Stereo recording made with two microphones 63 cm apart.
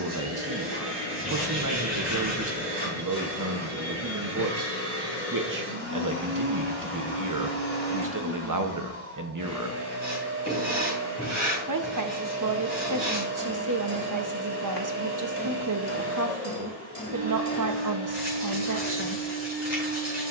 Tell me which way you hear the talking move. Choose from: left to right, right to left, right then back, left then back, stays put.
stays put.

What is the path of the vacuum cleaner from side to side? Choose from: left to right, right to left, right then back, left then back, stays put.
stays put.